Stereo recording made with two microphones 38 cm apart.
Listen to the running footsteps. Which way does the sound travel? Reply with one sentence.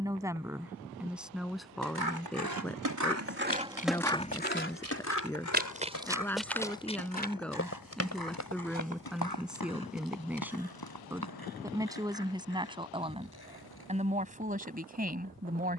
You can hear the running footsteps move from right to left.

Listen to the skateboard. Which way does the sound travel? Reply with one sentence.
In this clip you hear the skateboard move from right to left.